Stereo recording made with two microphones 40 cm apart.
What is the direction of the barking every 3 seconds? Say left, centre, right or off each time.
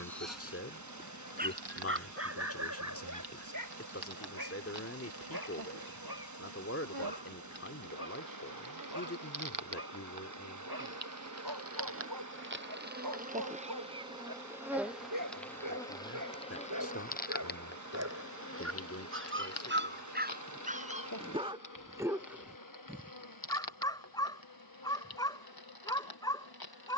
right, right, right, right, right, right, right, centre, centre.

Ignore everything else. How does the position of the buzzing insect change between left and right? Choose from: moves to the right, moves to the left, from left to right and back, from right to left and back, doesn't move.
moves to the left.